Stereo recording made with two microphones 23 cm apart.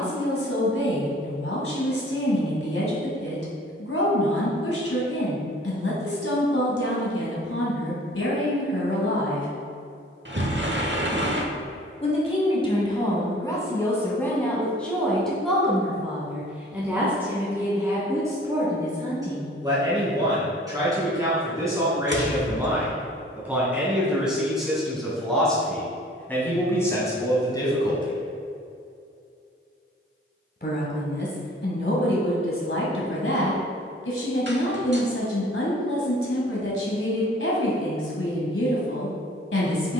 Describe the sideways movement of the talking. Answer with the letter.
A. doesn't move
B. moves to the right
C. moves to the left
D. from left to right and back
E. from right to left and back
D.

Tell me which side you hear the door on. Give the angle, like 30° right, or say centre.
50° right.